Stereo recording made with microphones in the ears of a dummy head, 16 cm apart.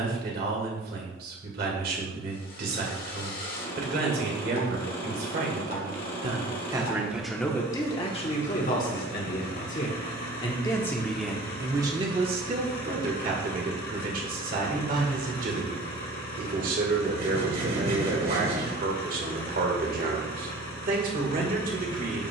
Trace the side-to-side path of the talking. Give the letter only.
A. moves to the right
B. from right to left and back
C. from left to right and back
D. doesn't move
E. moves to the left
B.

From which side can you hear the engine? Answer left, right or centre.
left.